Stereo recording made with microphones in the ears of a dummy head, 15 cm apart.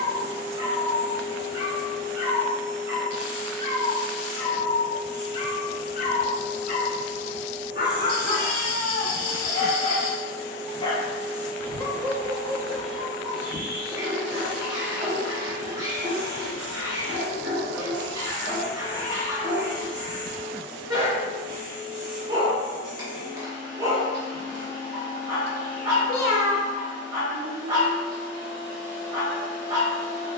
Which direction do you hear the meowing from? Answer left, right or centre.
left.